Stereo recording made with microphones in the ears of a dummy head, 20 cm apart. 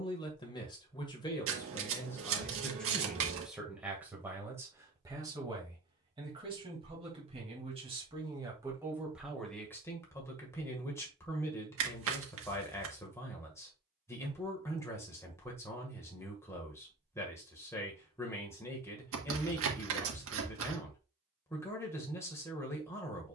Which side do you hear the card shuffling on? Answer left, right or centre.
right.